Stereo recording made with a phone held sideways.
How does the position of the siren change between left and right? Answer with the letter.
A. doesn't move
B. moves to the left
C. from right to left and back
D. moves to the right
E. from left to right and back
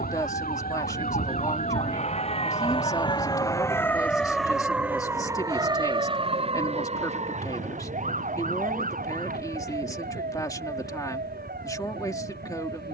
D.